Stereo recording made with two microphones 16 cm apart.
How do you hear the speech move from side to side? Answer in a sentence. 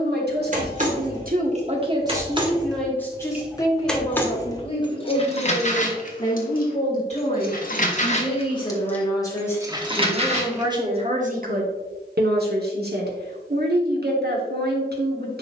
In this clip you hear the speech move from right to left and back again.